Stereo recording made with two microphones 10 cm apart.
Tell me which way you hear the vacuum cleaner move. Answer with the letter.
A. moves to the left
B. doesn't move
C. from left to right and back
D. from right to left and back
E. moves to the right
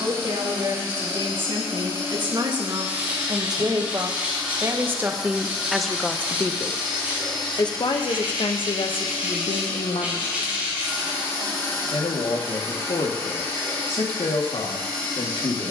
A.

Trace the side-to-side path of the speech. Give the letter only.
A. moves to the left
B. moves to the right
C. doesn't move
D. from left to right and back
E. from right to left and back
A.